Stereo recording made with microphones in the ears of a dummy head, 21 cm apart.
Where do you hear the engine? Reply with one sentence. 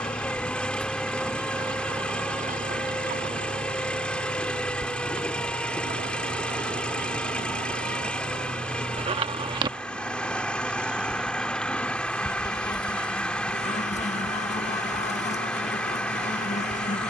You can hear the engine in the centre.